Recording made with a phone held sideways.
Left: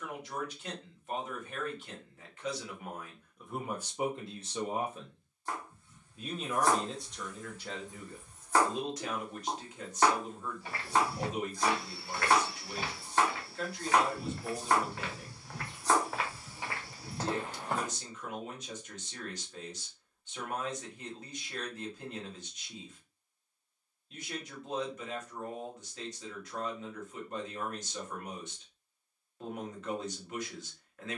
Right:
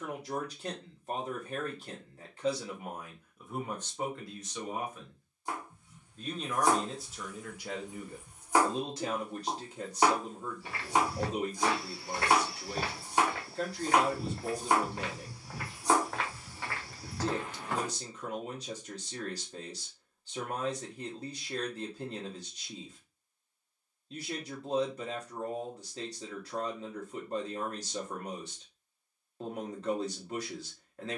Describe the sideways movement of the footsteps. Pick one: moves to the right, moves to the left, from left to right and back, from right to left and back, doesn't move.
from left to right and back.